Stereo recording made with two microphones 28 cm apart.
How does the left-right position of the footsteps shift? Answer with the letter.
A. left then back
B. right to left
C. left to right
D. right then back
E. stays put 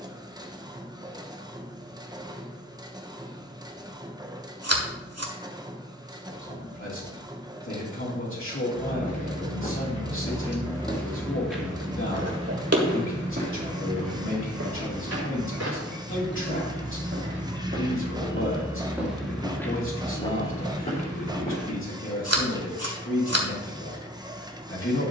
D.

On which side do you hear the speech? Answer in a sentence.
You can hear the speech on the left.